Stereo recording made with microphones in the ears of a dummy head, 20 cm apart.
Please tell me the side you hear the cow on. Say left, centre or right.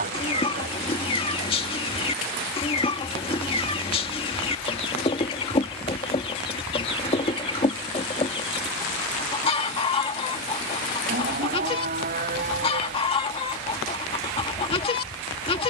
right.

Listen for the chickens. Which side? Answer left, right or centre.
left.